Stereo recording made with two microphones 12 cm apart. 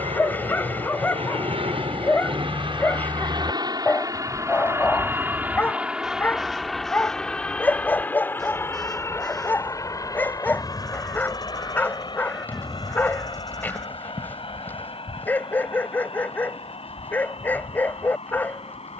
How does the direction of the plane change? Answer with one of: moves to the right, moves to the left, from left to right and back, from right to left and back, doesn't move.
moves to the left.